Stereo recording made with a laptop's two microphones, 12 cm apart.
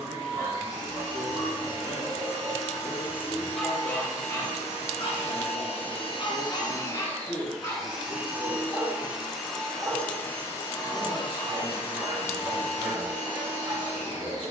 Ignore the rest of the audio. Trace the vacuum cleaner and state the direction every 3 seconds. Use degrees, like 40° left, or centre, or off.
80° left, 70° left, 10° left, 20° left, 70° left.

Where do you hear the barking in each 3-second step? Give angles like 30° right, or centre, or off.
30° right, 20° left, 30° left, 20° right, 30° right.